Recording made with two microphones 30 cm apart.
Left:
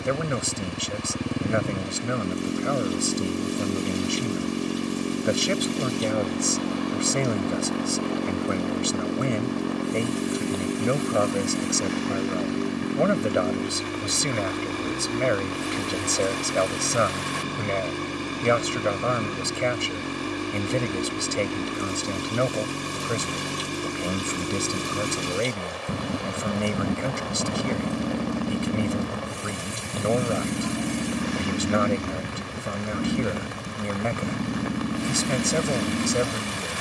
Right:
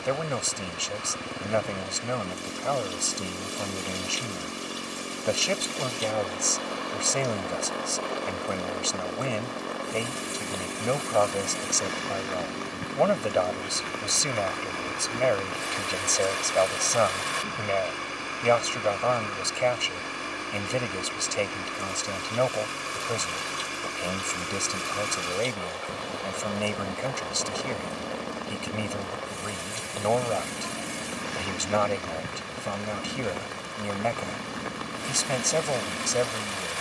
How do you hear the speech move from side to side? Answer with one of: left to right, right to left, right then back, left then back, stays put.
stays put.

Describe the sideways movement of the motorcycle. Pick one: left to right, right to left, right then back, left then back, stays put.
stays put.